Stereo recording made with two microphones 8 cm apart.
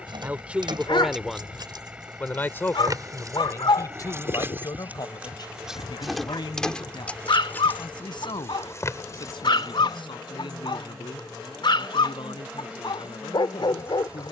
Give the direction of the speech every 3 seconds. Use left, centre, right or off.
centre, left, left, left, left.